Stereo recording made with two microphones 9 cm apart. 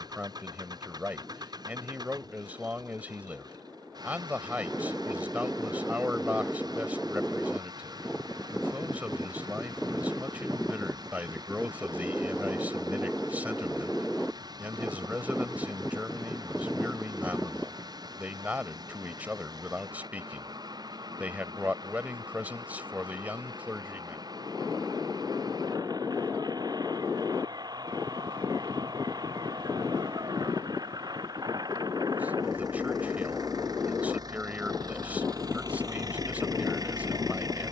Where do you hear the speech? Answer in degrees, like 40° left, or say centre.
20° right.